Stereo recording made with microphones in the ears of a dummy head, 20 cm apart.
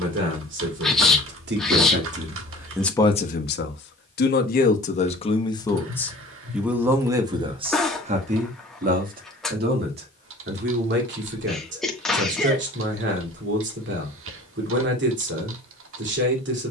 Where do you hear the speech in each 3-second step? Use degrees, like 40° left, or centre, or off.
40° right, 30° left, 20° right, 50° right, 60° right, 60° right.